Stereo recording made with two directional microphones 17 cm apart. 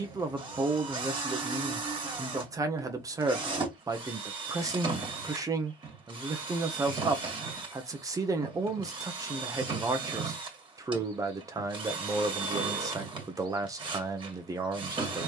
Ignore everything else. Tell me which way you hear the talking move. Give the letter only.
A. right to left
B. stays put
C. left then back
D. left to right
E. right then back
B.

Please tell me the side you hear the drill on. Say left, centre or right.
right.